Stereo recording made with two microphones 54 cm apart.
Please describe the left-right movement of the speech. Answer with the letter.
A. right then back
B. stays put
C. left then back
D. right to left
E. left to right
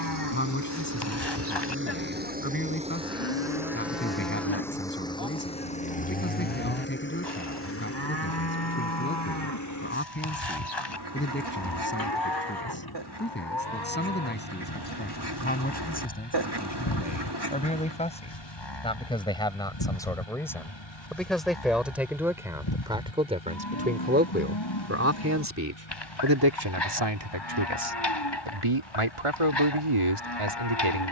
E.